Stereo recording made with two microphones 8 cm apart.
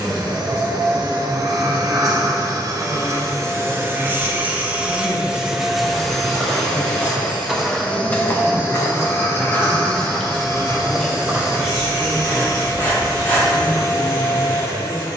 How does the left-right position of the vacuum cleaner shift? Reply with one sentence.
In this clip you hear the vacuum cleaner travel towards the left.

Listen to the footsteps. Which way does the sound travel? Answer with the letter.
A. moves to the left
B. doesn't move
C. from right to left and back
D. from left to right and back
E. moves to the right
C.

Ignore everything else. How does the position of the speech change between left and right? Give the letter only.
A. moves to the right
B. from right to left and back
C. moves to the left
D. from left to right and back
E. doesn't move
A.